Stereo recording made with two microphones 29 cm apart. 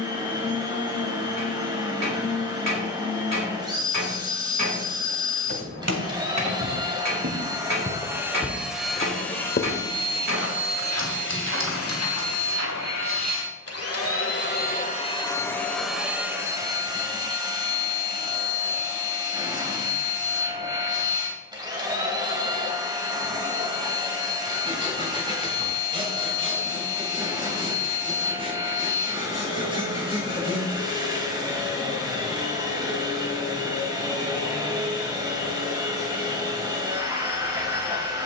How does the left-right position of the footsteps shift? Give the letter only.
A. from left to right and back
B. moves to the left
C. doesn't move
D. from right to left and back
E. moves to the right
B.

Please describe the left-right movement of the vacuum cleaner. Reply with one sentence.
You can hear the vacuum cleaner move from right to left and back again.